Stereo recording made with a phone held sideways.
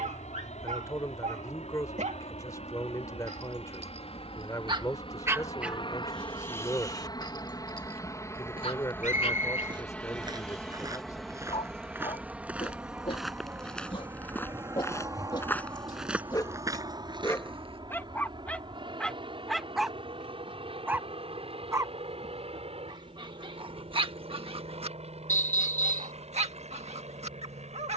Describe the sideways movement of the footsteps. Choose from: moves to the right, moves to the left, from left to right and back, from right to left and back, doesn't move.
from right to left and back.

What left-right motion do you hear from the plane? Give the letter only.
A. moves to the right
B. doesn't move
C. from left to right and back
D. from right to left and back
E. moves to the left
A.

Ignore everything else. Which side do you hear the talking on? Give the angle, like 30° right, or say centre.
20° left.